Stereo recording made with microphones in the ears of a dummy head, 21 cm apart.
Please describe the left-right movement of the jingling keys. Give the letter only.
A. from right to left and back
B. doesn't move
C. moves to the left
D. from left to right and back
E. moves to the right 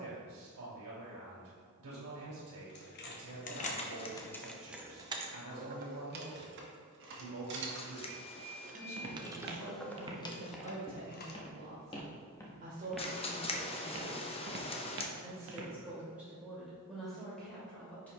D.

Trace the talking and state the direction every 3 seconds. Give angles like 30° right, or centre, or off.
70° right, 70° right, 70° right, 50° right, 30° right, centre.